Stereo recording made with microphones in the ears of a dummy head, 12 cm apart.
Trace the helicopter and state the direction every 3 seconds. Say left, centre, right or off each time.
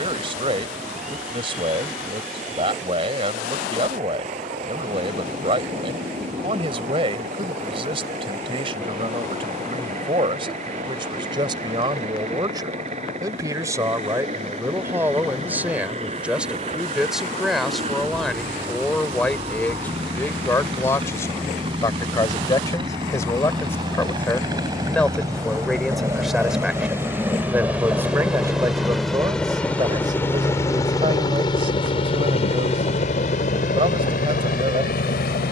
right, right, right, right, right, right, right, right, right, centre, left, left.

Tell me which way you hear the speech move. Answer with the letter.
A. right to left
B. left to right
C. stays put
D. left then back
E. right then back
D.